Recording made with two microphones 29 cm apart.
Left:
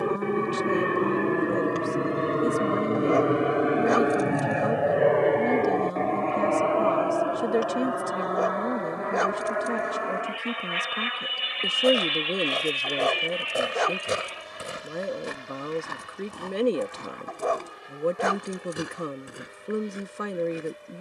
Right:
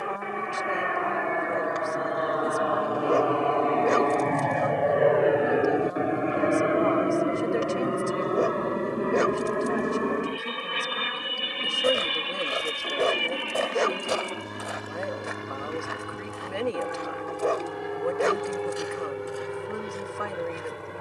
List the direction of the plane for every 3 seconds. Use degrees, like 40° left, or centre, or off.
40° left, 10° left, 20° right, 40° right, 50° right, 60° right, 60° right.